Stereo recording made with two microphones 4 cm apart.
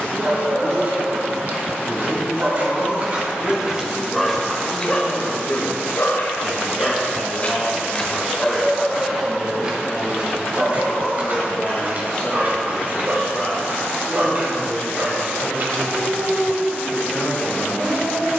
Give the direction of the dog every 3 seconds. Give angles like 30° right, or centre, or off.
40° right, 10° left, 30° left, 30° right, 40° right, 40° right.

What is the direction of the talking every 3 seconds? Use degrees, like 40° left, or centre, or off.
30° left, 10° left, 10° right, 10° left, 30° left, 30° left.